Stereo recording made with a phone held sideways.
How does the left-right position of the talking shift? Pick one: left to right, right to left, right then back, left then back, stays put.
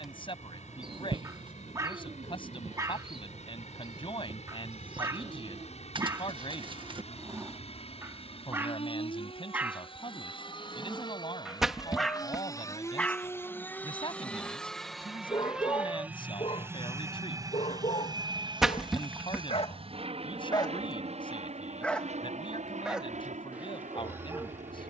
stays put.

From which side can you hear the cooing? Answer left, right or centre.
right.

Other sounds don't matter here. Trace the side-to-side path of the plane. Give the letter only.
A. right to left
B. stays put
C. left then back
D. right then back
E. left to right
E.